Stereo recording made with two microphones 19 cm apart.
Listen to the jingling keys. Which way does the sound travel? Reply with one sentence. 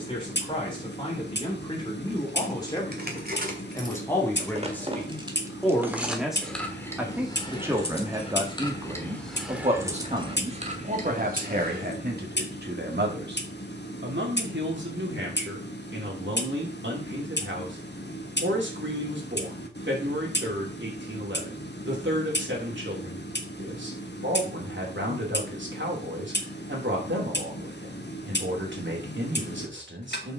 You can hear the jingling keys go left and come back.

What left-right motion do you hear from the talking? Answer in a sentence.
In this clip you hear the talking move to the right.